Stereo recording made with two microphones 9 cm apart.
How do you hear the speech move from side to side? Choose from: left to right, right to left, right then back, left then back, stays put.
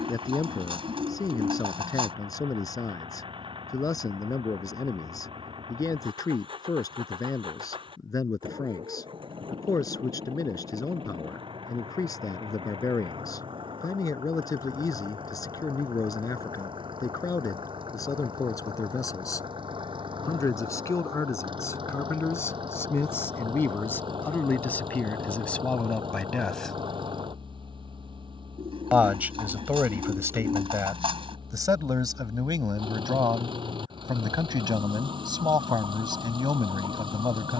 left to right.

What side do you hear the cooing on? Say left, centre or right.
right.